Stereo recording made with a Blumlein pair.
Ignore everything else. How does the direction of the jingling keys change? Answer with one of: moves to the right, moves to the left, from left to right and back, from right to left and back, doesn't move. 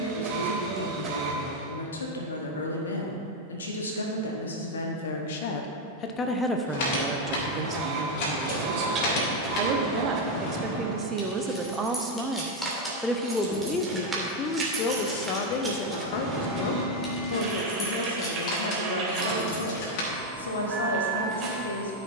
from left to right and back.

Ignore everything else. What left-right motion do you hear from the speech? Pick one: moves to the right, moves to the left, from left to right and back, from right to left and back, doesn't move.
from left to right and back.